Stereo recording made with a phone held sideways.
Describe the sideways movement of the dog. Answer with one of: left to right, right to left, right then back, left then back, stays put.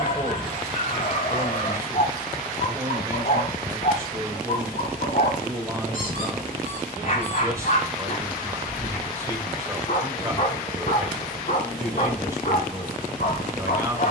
stays put.